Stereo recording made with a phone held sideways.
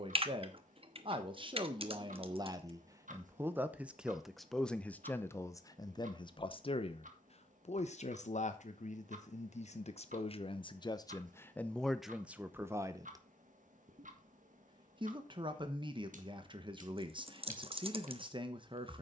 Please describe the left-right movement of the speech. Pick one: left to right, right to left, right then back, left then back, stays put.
left then back.